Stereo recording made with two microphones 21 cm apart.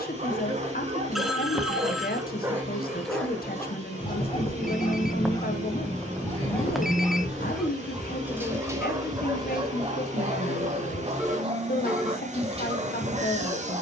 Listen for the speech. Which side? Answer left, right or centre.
left.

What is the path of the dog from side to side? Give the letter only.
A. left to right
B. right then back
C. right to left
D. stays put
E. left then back
E.